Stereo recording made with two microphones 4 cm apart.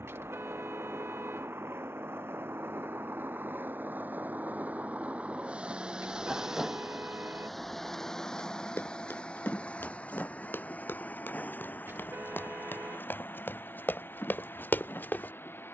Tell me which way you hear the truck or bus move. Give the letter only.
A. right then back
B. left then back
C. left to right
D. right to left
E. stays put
D.